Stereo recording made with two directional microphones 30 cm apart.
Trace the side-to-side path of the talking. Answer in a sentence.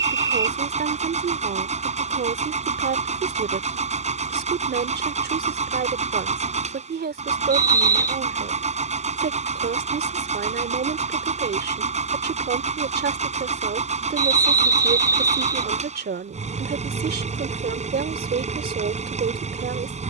In this clip you hear the talking stay in one place.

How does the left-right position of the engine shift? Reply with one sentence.
You can hear the engine stay in one place.